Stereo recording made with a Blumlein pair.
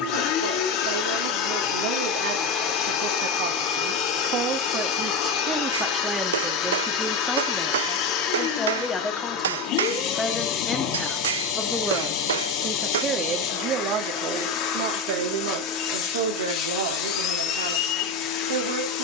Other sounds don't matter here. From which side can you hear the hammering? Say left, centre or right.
right.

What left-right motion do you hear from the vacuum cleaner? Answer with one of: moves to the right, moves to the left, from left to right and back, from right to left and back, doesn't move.
doesn't move.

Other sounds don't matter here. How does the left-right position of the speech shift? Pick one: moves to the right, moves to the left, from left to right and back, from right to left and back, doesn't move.
from right to left and back.